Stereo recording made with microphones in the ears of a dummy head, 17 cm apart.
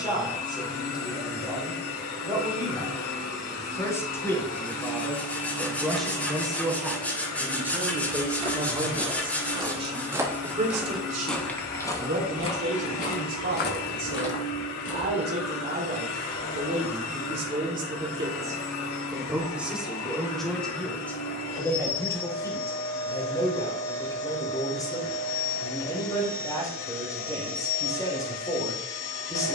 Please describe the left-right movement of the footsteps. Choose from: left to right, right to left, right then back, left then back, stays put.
right to left.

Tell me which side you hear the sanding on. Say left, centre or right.
centre.